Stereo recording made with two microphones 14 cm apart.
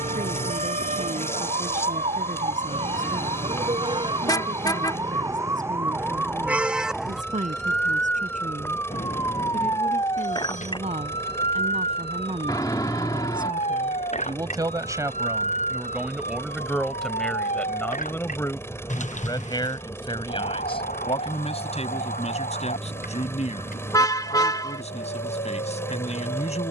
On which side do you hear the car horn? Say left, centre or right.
left.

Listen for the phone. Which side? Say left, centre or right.
left.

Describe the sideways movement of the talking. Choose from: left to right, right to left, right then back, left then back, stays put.
right to left.